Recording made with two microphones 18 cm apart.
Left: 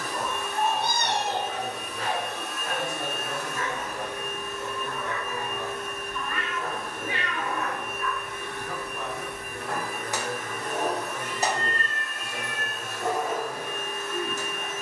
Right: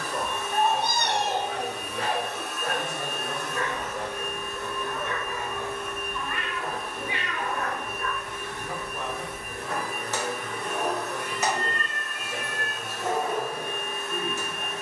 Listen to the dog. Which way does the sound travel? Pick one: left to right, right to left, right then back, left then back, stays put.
right to left.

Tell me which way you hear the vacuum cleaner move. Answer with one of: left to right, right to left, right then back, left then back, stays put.
left then back.